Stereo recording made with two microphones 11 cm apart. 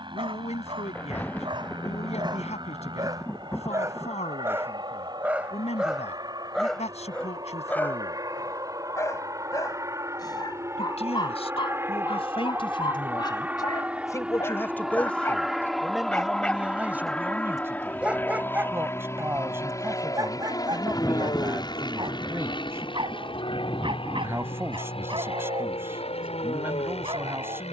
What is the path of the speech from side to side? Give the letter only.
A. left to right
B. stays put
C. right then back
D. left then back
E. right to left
A.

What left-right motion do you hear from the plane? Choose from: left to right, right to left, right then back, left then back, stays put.
right to left.